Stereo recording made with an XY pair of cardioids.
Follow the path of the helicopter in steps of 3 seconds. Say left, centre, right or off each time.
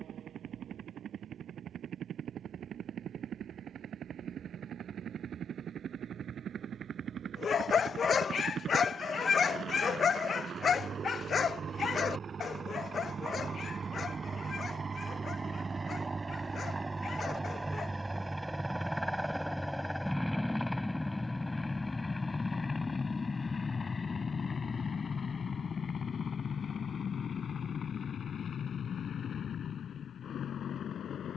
right, right, right, right, right, right, centre, left, left, left, left.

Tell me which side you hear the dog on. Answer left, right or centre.
left.